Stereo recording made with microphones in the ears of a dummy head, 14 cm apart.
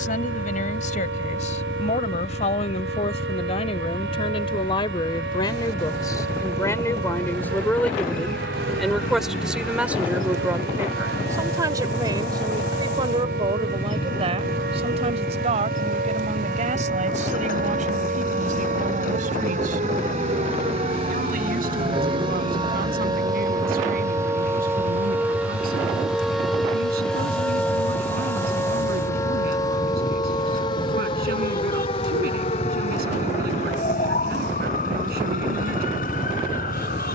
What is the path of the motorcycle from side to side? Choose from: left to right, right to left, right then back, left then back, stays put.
stays put.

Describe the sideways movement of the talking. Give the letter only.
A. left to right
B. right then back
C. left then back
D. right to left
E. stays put
A.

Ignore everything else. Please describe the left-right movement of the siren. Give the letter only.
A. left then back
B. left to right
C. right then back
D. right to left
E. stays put
D.